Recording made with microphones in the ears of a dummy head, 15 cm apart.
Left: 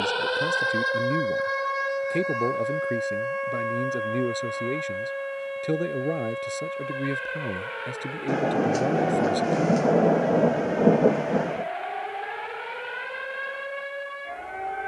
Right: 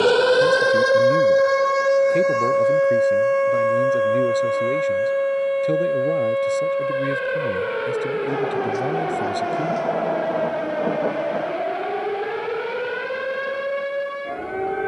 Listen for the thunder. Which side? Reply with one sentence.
In this clip you hear the thunder on the left.